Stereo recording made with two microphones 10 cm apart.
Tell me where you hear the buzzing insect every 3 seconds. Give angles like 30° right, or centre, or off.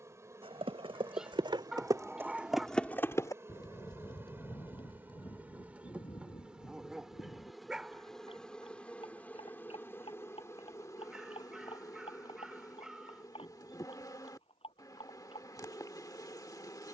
30° right, 20° right, centre, 30° left, 40° left, 40° left.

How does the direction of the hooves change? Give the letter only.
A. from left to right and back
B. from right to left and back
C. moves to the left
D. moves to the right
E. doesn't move
C.